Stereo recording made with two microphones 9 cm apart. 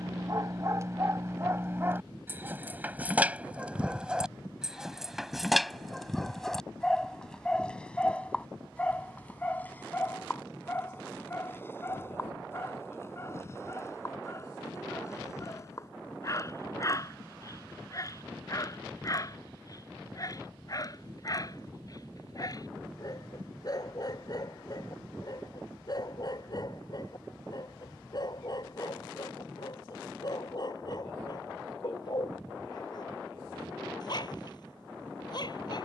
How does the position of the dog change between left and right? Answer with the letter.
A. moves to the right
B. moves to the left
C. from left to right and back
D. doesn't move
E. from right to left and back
B.